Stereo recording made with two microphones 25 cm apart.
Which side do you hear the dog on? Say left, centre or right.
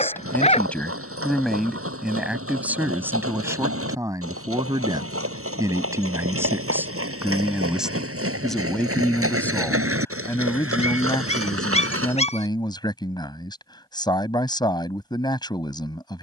left.